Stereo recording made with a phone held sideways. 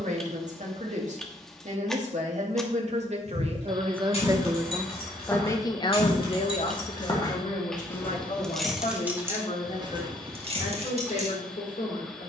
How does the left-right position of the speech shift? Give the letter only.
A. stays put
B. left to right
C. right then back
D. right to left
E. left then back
D.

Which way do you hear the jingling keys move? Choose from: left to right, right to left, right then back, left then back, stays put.
left to right.